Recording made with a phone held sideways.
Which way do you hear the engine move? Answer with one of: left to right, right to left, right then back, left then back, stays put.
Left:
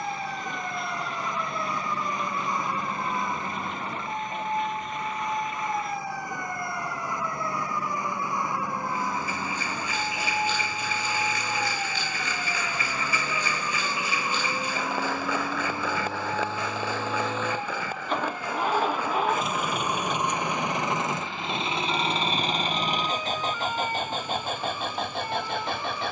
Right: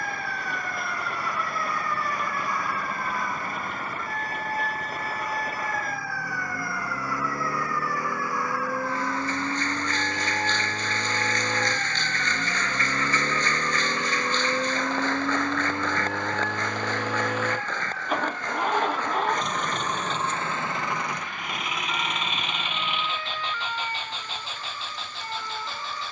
right to left.